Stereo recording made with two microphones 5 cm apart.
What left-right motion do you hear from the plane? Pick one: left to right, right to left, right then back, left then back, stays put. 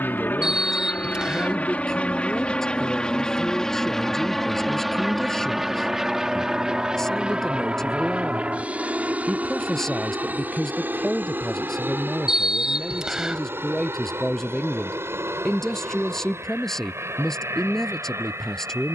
left to right.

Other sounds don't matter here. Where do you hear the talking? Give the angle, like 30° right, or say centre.
10° left.